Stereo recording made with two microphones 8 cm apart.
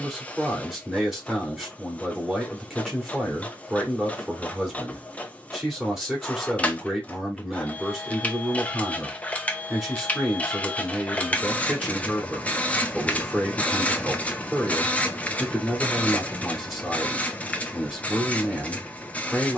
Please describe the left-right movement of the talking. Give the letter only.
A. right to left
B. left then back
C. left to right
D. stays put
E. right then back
D.